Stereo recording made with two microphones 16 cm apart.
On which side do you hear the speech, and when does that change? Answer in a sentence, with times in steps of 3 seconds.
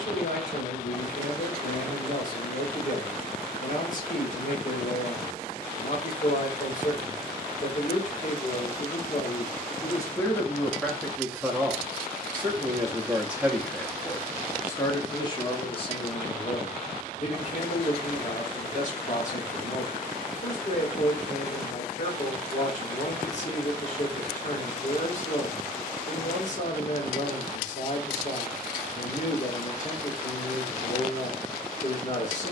In this clip you hear the speech on the left from 0 s, in the centre from 9 s and on the left from 15 s.